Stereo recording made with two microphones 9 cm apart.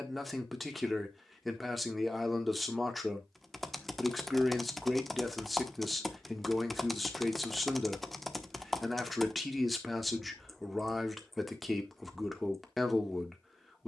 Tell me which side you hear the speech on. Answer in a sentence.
You can hear the speech in the centre.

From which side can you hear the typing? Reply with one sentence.
In this clip you hear the typing in the centre.